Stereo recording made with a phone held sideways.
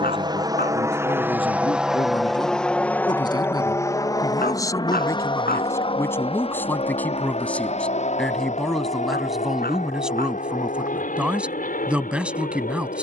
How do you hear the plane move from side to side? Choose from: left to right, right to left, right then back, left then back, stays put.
right to left.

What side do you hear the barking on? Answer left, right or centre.
left.